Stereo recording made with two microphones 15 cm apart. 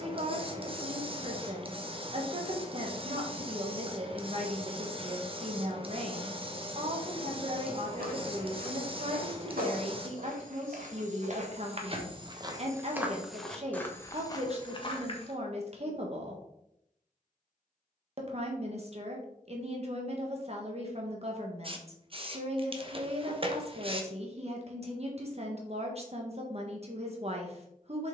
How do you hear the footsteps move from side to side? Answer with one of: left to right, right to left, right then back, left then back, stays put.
right to left.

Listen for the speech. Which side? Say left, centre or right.
right.